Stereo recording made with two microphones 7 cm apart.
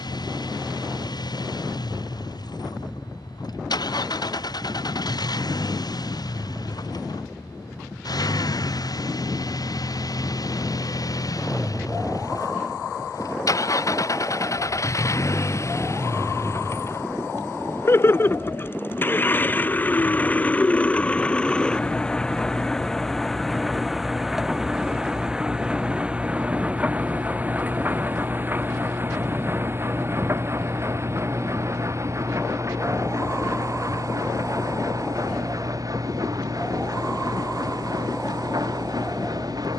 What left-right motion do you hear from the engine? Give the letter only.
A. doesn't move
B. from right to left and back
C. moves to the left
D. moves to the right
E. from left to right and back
D.